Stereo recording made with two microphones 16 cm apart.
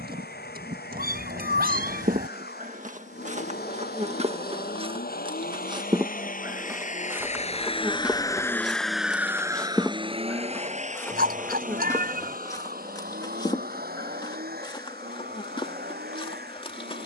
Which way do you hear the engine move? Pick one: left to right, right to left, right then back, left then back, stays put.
left to right.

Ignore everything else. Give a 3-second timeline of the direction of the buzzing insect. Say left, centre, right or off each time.
right, right, centre, centre, left, left.